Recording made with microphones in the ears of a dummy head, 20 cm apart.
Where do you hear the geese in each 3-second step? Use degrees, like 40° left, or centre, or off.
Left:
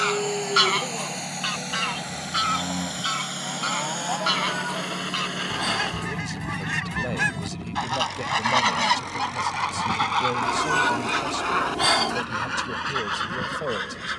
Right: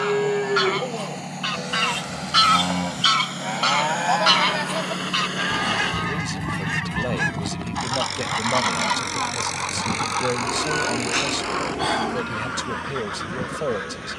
10° left, 10° right, 20° left, 50° left, 60° left.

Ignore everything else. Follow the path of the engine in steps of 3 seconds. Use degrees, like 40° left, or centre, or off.
40° left, 10° left, 20° right, 40° right, 60° right.